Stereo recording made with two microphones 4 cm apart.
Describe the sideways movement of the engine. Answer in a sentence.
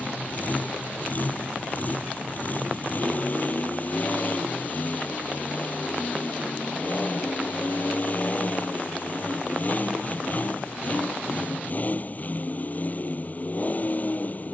You can hear the engine stay put.